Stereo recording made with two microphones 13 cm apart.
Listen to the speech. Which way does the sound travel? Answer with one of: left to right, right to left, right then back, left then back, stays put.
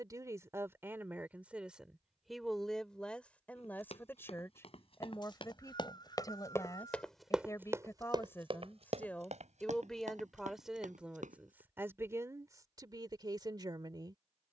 left then back.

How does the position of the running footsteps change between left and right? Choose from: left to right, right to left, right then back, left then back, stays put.
left to right.